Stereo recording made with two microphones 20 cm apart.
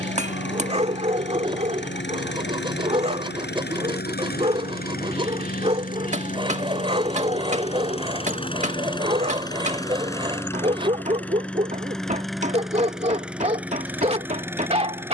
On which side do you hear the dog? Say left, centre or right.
right.